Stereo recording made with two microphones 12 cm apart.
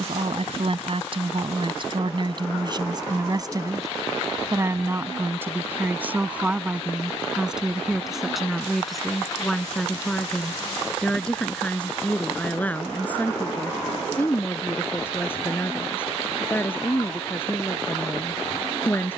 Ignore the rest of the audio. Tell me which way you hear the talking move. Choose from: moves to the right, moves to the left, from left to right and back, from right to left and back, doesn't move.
moves to the left.